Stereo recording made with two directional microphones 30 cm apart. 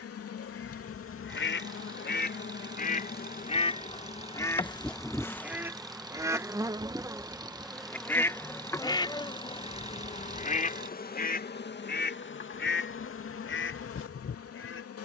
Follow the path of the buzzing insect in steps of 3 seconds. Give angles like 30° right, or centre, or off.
40° left, 20° left, centre, 30° left, 50° left.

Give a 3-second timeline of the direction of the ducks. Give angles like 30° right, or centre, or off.
40° left, 10° left, centre, 20° left, 40° left.